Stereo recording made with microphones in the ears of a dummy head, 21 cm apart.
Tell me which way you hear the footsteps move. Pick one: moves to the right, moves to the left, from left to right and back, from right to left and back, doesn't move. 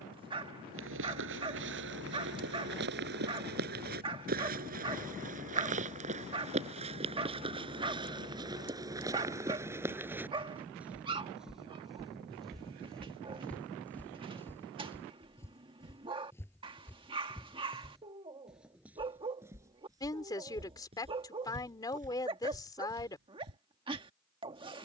from right to left and back.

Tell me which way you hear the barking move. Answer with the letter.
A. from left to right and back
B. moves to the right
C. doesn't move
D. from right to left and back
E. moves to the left
C.